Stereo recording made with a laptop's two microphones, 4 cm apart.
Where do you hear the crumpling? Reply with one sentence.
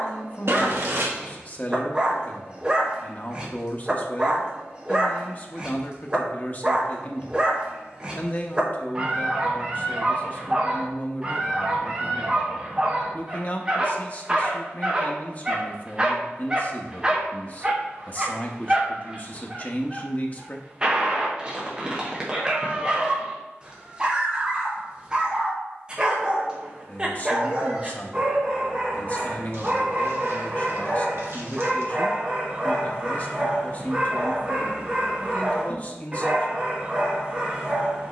In this clip you hear the crumpling on the right.